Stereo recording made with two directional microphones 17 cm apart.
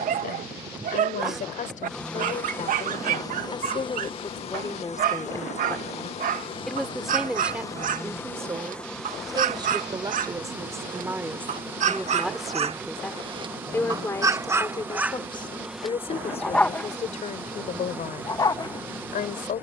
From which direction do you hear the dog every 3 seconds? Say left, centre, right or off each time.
right, right, right, right, right, centre, left.